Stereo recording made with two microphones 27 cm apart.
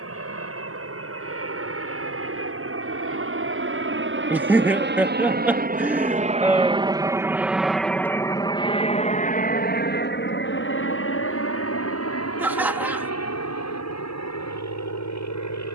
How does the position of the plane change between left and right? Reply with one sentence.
You can hear the plane move to the left.